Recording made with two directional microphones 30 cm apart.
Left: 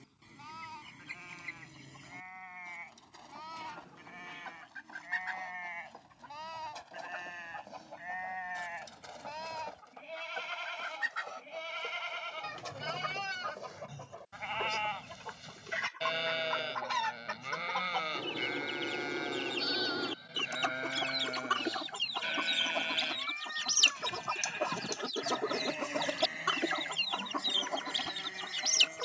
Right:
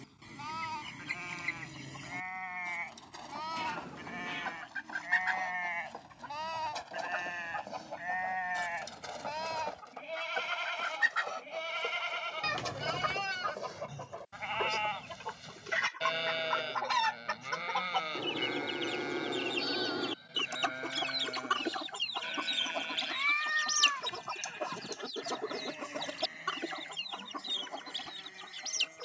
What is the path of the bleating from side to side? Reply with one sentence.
You can hear the bleating move from right to left.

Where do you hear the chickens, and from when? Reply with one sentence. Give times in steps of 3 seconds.
In this clip you hear the chickens on the right from 0 s, in the centre from 18 s and on the left from 24 s.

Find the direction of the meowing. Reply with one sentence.
In this clip you hear the meowing on the right.